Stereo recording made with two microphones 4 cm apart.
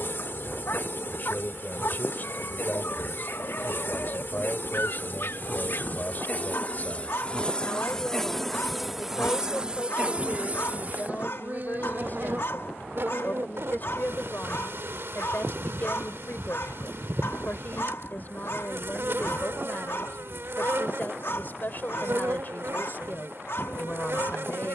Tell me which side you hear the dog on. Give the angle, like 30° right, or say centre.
60° left.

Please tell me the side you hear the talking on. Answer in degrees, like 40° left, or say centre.
50° left.